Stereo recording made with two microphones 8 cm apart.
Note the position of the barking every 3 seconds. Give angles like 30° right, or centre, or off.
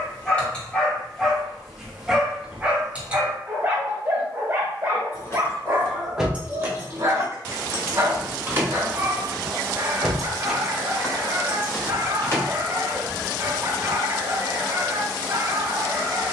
centre, 30° right, 40° right, 40° right, 40° right, 40° right.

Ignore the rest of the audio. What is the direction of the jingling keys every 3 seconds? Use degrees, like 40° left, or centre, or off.
off, 30° left, 30° right, centre, 40° left, off.